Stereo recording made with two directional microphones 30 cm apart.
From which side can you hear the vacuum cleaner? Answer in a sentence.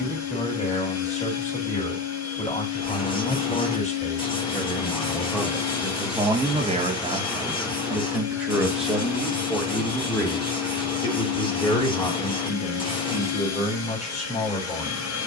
In this clip you hear the vacuum cleaner on the left.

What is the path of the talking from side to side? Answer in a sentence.
In this clip you hear the talking move from left to right and back again.